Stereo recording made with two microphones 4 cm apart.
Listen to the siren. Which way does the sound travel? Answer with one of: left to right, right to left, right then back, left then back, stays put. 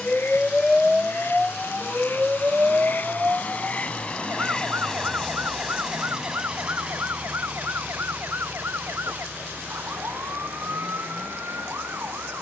left to right.